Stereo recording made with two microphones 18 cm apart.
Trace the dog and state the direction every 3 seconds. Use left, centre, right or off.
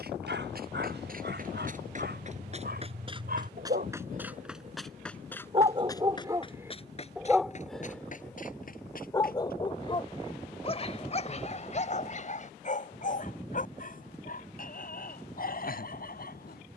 right, right, centre, left, left, left.